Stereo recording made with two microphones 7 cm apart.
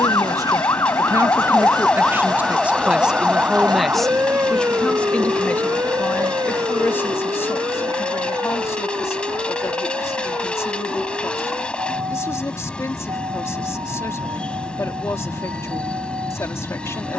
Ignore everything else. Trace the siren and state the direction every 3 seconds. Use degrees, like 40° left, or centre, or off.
20° left, 30° right, 60° right, 60° right, 70° right, 70° right.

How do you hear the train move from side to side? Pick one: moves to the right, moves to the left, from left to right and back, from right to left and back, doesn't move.
doesn't move.